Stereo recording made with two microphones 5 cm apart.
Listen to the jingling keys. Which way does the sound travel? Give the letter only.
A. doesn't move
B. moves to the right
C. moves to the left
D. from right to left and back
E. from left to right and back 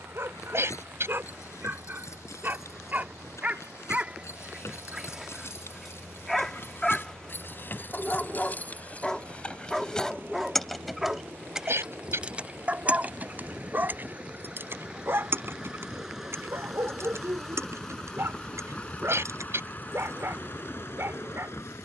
B.